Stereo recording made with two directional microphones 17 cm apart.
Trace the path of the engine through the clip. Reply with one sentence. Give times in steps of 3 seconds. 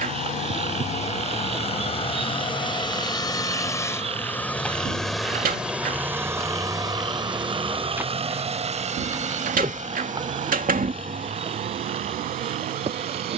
In this clip you hear the engine on the left from 0 s, in the centre from 3 s and on the right from 6 s.